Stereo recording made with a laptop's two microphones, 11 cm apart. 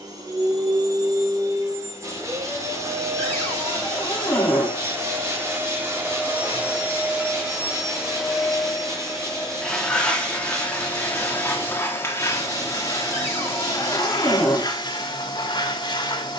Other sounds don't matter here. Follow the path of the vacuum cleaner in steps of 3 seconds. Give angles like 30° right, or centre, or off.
30° right, 20° right, 10° right, 10° left, 30° left, 40° left.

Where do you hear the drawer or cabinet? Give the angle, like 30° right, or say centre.
20° left.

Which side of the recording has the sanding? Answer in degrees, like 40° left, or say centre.
30° right.